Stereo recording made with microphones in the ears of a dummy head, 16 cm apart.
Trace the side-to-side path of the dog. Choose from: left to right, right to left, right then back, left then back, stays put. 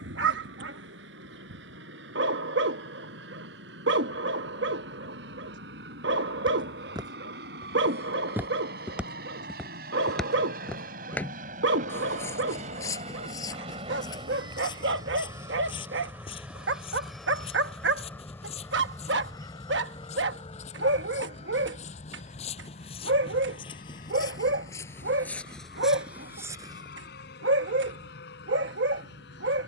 stays put.